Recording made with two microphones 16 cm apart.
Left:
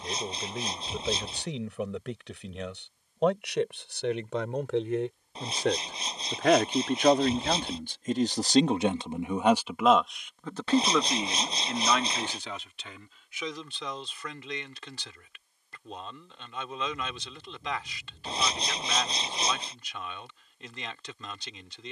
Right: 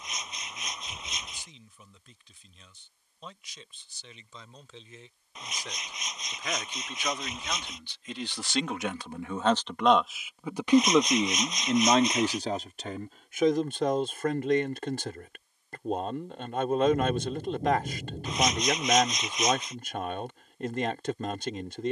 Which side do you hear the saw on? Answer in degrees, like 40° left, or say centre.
30° left.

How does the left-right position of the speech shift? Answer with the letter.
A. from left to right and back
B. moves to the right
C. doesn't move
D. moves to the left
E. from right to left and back
B.